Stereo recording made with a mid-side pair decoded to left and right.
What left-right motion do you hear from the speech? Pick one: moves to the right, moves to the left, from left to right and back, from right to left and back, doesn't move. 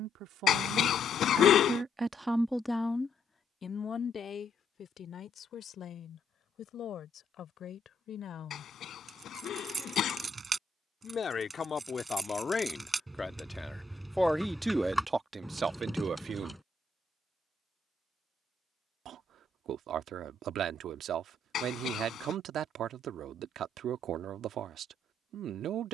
from right to left and back.